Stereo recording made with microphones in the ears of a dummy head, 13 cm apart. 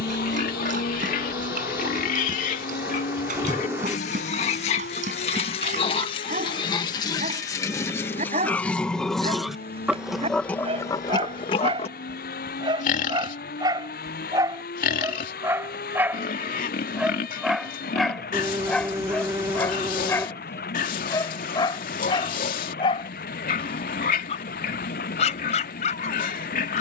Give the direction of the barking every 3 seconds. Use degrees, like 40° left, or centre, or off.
60° right, 60° right, 50° right, 40° right, 30° right, 10° right, 10° left, 30° left, 50° left.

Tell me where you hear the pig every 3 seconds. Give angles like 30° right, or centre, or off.
60° left, 50° left, 20° left, 20° left, 60° left, 60° left, 60° left, 60° left, 60° left.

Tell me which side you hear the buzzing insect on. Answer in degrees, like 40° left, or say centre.
20° right.